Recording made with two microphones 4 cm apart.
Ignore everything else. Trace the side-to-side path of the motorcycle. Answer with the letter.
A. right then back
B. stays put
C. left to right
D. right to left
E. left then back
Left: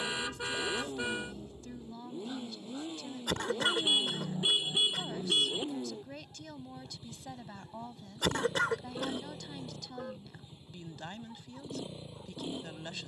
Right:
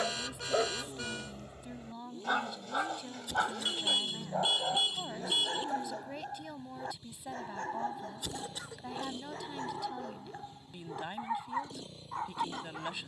B.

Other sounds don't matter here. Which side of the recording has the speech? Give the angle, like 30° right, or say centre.
10° right.